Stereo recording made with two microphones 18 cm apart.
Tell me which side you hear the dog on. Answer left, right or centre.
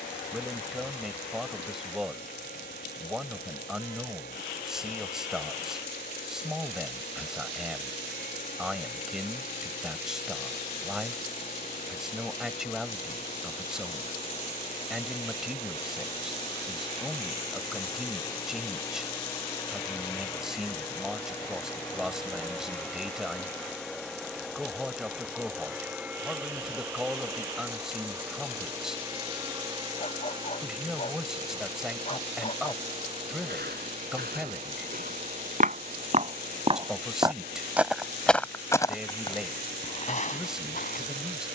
left.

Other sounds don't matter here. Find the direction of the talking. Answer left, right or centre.
centre.